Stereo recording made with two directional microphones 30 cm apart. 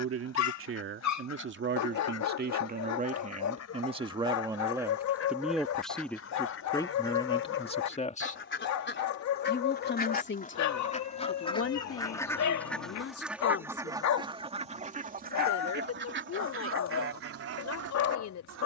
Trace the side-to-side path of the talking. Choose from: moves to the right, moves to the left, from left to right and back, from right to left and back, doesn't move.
moves to the left.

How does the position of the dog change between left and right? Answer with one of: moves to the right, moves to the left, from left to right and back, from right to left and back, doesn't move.
doesn't move.